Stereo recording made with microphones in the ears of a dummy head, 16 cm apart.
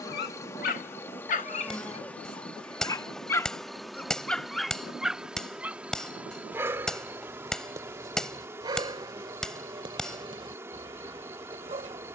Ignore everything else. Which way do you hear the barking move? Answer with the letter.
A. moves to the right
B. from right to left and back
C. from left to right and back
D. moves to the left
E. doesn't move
A.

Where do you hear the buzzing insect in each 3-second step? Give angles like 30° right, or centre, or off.
10° left, centre, 10° right, 10° right.